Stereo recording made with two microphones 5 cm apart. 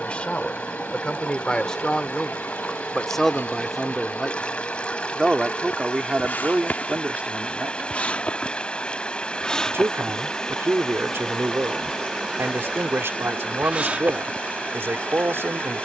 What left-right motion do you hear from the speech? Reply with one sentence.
In this clip you hear the speech move to the right.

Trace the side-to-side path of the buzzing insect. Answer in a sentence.
In this clip you hear the buzzing insect move from left to right.